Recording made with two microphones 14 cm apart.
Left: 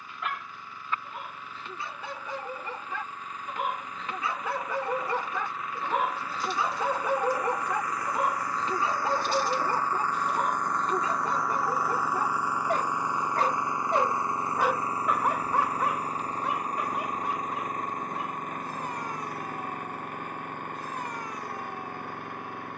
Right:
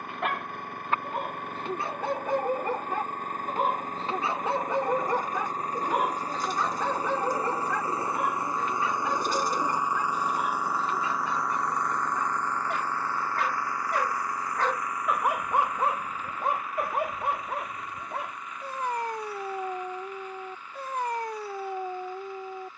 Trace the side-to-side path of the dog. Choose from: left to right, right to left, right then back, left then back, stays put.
left then back.